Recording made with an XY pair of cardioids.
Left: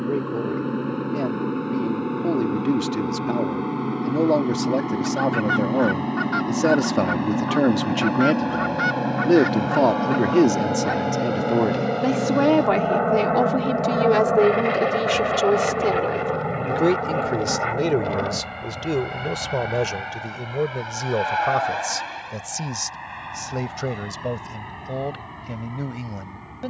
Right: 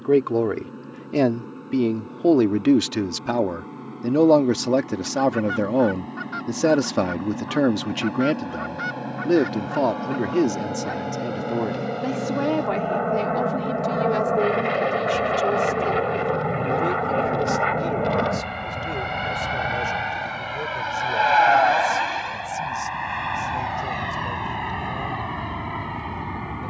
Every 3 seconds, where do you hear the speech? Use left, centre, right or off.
right, right, centre, left, left, left, left, left, left.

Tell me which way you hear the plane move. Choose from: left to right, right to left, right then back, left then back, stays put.
left to right.